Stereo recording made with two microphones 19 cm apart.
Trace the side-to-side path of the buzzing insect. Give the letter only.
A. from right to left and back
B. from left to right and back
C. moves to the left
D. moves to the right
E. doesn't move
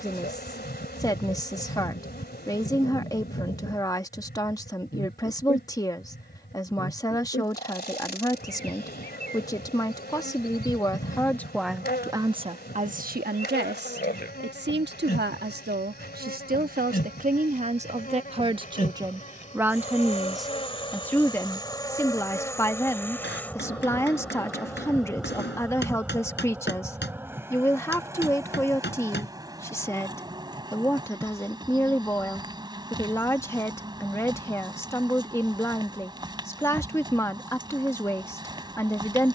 D.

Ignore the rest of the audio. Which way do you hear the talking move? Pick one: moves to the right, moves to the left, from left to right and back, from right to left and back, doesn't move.
from left to right and back.